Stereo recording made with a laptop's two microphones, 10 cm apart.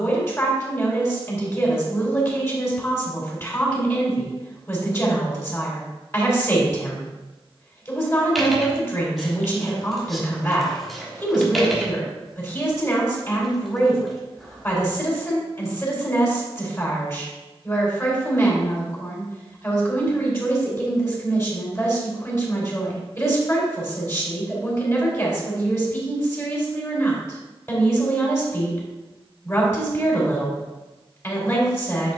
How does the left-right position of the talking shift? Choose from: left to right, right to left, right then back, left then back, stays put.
stays put.